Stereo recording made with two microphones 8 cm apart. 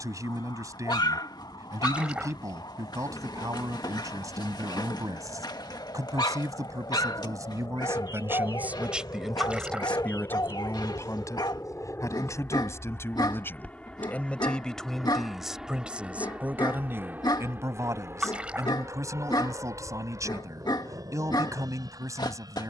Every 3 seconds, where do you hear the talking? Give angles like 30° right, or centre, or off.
50° right, 50° right, 40° right, 30° left, 30° left, 20° right, 40° right, 40° right.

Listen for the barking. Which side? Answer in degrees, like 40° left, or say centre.
70° left.